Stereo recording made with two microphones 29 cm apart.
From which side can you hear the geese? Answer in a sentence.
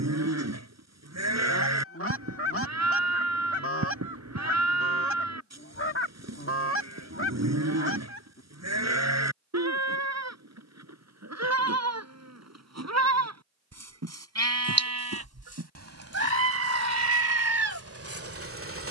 In this clip you hear the geese on the left.